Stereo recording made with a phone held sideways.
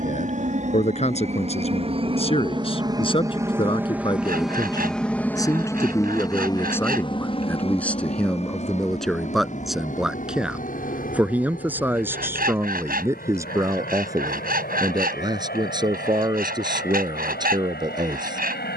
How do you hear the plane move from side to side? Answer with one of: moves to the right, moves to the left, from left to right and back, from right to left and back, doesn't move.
moves to the left.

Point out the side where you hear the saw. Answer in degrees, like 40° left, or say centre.
60° right.